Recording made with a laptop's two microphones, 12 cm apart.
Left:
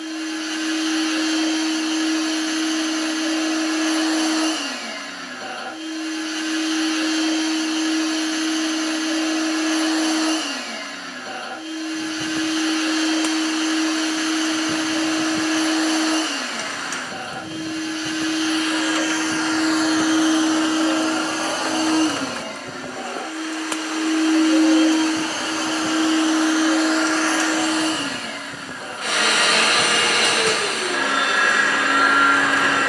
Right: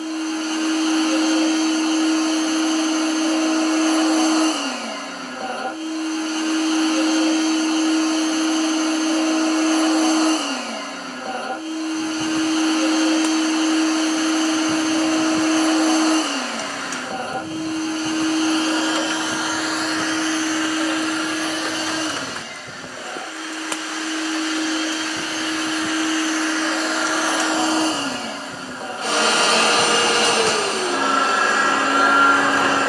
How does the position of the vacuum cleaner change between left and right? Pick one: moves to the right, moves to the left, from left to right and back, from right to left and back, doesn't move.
from right to left and back.